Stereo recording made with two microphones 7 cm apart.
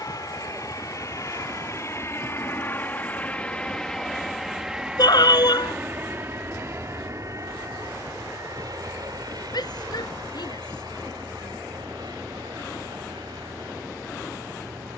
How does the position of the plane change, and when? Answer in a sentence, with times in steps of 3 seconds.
You can hear the plane on the left from 0 s, in the centre from 3 s and on the right from 6 s.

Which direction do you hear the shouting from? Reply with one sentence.
In this clip you hear the shouting on the left.